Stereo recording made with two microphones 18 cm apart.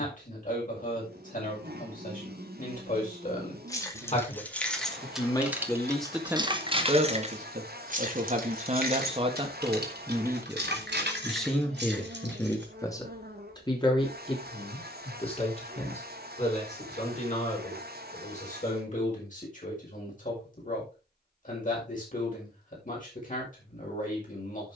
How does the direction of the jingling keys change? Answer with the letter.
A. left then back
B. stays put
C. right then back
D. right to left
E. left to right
E.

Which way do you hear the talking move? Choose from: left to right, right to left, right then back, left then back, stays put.
right then back.